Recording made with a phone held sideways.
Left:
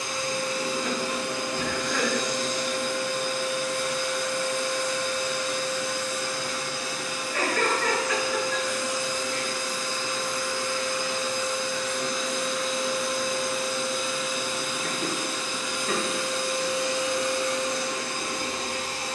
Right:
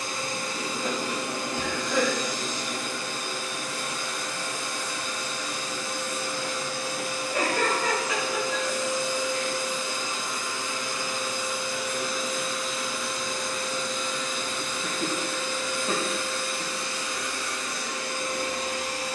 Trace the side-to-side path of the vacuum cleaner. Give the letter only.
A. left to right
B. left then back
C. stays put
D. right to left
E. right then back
D.